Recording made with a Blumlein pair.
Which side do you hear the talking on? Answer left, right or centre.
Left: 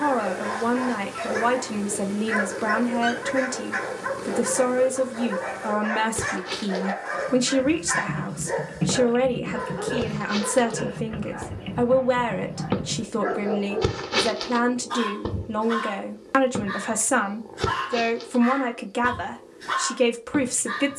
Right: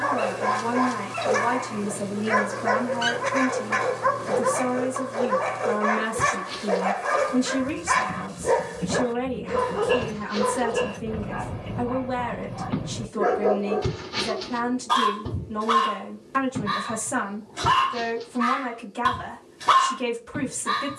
left.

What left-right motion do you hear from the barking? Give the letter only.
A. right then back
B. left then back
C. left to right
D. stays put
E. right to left
D.